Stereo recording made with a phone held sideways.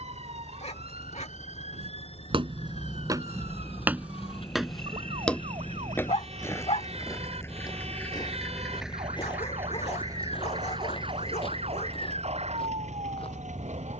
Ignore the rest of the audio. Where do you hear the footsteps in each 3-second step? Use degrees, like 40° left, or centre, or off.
40° right, centre, 30° left, 40° left, 40° left.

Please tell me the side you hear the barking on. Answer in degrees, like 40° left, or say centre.
50° left.